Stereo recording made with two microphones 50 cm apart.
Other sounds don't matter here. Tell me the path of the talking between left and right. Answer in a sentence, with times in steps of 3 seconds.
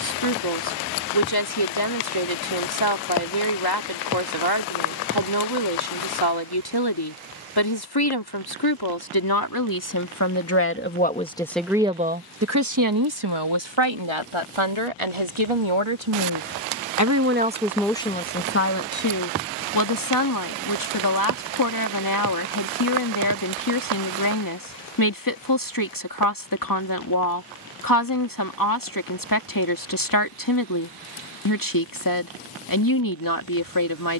You can hear the talking on the left from 0 s, on the right from 12 s and on the left from 18 s.